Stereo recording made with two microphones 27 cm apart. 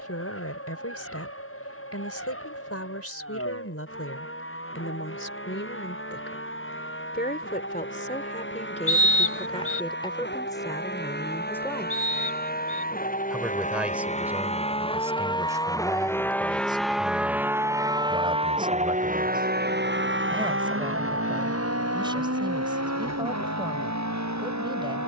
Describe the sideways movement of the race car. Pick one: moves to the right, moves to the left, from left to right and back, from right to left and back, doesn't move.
moves to the right.